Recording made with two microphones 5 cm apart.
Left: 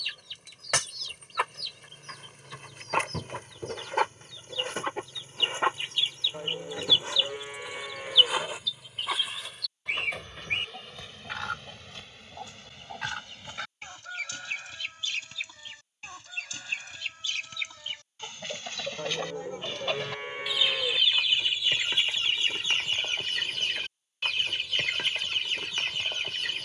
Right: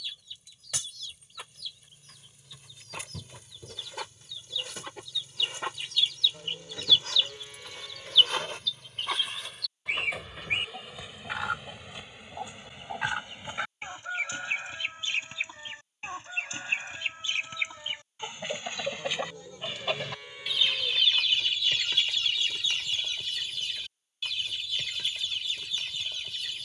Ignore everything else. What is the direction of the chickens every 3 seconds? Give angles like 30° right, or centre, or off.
60° left, 40° left, 20° left, 10° right, 20° right, 20° right, 10° right, 30° left, 50° left.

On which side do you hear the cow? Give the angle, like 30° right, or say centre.
40° left.